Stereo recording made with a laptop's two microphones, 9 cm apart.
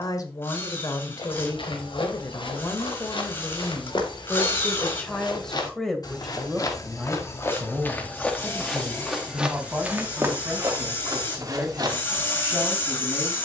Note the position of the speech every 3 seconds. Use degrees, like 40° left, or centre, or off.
40° left, 20° left, 10° right, 20° right, 20° right.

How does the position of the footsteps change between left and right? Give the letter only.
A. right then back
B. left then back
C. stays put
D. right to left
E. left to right
E.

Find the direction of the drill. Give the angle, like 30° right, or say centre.
30° left.